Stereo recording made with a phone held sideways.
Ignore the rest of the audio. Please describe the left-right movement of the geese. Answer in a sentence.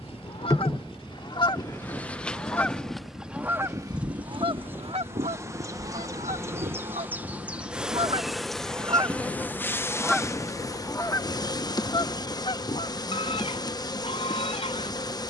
In this clip you hear the geese go right and come back.